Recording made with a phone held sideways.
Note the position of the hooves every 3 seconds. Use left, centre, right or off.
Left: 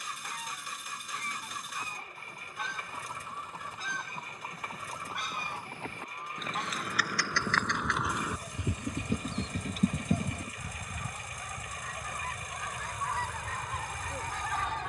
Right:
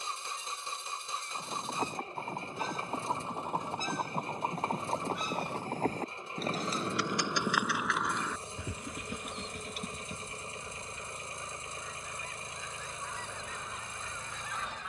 right, right, centre, left, off.